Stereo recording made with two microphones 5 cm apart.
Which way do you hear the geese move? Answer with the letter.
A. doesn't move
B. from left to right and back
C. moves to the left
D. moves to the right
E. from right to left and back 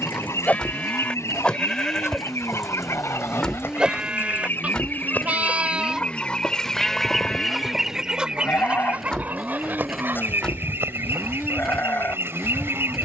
D.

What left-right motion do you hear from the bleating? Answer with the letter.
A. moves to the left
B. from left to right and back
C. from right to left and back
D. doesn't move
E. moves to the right
B.